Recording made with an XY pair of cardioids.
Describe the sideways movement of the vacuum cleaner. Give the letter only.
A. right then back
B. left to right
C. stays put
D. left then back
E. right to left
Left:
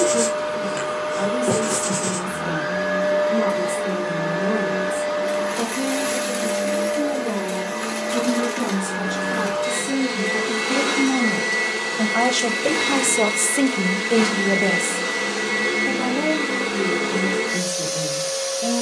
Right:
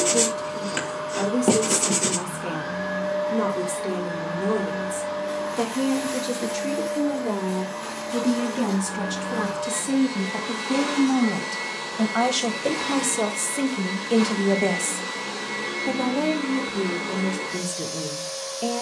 C.